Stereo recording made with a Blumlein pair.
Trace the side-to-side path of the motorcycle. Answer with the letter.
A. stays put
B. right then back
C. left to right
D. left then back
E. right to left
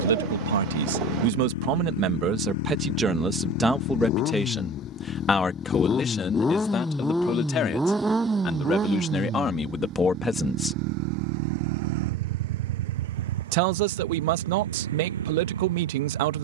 C.